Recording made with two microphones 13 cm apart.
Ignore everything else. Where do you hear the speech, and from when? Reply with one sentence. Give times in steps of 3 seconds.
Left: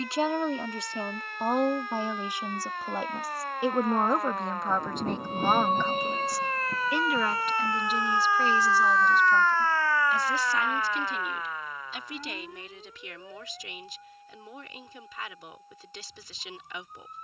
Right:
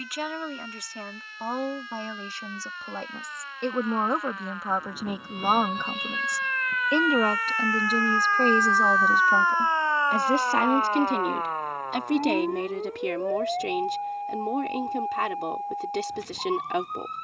You can hear the speech on the left from 0 s, in the centre from 3 s and on the right from 6 s.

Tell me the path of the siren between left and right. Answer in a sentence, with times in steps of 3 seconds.
You can hear the siren on the left from 0 s and on the right from 9 s.